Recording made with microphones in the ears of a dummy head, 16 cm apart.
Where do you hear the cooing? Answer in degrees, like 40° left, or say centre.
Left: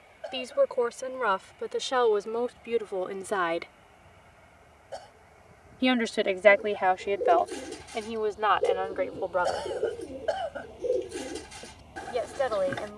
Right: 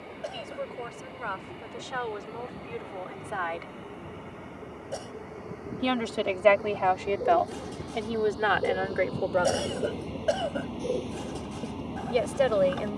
20° left.